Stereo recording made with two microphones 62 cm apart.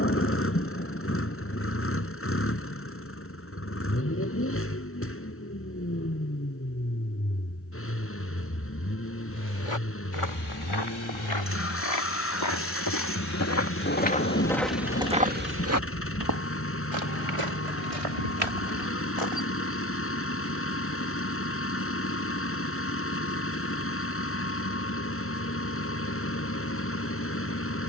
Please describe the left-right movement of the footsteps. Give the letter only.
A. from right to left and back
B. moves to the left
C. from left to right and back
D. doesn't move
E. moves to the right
E.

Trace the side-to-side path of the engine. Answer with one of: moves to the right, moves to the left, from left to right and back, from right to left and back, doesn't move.
doesn't move.